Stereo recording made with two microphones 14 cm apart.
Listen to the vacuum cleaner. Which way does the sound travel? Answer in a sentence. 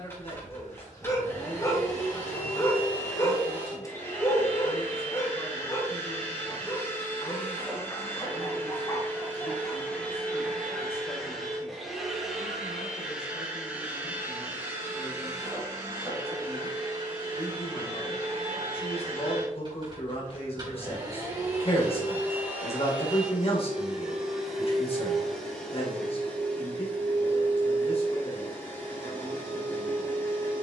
In this clip you hear the vacuum cleaner move from left to right and back again.